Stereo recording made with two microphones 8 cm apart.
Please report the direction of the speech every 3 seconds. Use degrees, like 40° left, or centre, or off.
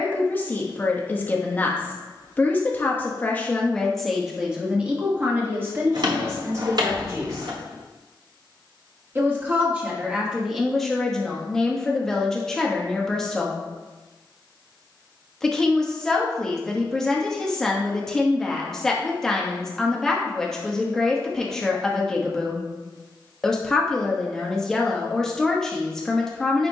20° left, 10° right, 30° right, 10° right, 10° left, 10° left, 10° left, 10° left, 10° left.